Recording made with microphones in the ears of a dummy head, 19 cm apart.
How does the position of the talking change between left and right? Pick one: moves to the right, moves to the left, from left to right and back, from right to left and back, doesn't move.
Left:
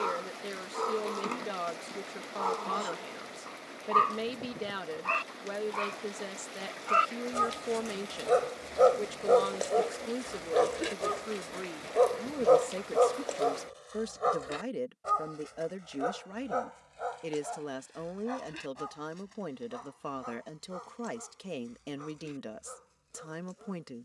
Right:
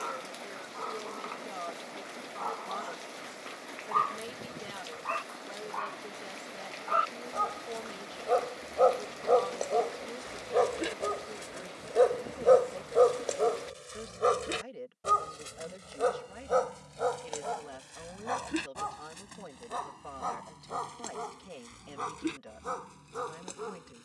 doesn't move.